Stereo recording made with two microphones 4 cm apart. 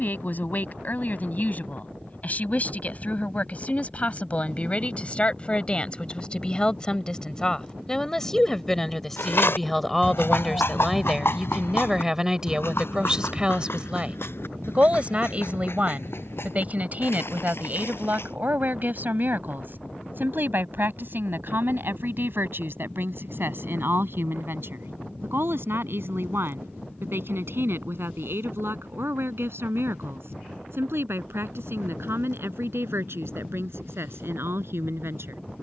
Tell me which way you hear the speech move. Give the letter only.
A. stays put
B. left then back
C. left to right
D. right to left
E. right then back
C.